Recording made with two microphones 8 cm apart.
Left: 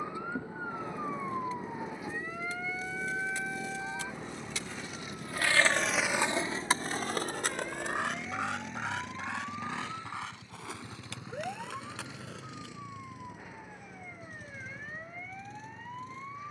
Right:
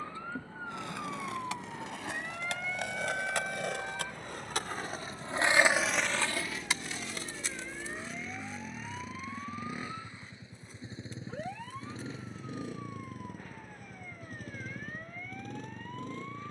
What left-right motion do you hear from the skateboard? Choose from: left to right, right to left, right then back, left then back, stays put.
right to left.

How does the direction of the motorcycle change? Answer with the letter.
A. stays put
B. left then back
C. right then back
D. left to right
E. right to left
D.